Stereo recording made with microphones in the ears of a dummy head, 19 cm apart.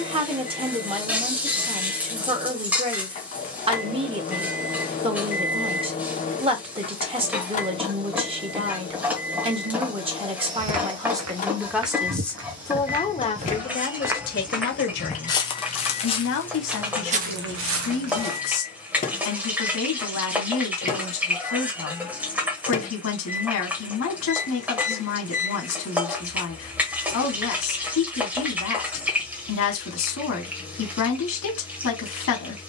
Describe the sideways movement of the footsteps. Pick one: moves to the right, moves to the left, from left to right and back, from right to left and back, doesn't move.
from right to left and back.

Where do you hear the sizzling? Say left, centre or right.
centre.